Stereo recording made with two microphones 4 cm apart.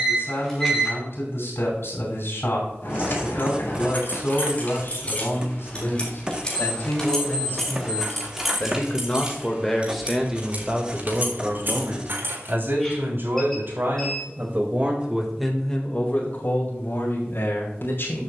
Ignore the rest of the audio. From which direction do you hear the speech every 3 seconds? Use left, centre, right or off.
left, left, left, centre, right, left.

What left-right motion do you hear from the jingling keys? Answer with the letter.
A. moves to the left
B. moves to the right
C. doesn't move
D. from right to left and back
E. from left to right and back
B.